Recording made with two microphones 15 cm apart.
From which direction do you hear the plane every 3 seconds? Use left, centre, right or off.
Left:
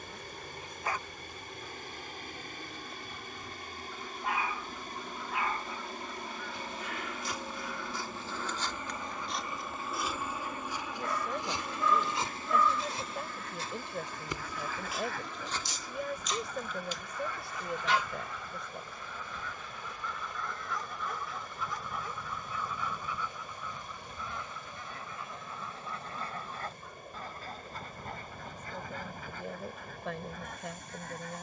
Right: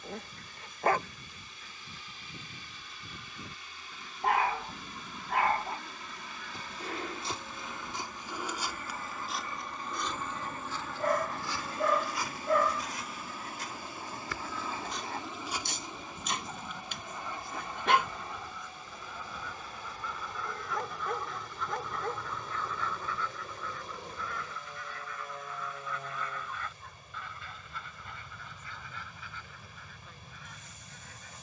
left, left, left, centre, centre, right, right, right, right, right, right.